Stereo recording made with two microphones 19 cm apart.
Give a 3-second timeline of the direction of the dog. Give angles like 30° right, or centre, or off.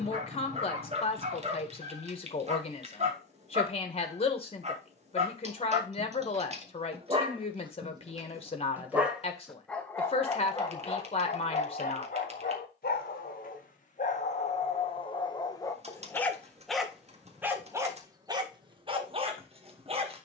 40° right, 40° right, 30° right, 20° left, 40° left, 10° left, 30° right.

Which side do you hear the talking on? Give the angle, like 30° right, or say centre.
30° left.